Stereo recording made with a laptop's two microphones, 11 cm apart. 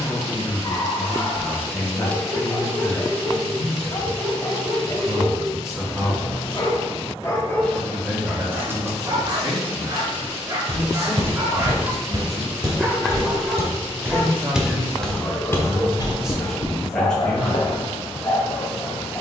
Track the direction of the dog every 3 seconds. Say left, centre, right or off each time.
left, left, centre, right, centre, left, left.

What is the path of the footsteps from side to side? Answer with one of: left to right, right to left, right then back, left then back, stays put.
right to left.